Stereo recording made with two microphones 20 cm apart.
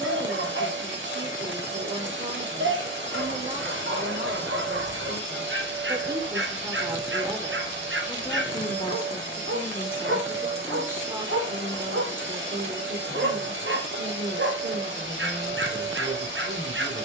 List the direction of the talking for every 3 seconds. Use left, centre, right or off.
right, right, centre, centre, right, right.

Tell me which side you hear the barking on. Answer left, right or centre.
right.